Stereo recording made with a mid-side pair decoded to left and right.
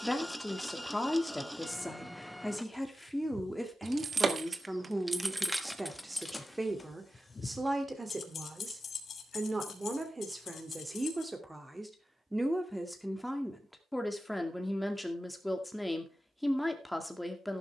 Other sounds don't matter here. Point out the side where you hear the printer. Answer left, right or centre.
centre.